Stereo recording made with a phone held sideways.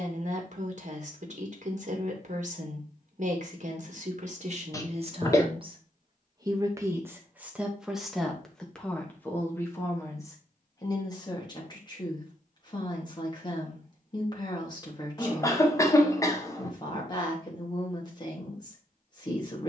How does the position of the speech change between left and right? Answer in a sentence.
In this clip you hear the speech travel towards the left.